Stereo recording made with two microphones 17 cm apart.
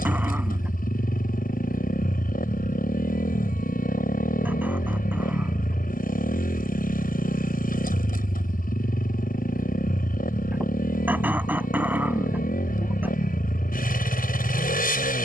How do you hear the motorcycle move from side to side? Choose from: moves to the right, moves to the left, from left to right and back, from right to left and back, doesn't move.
doesn't move.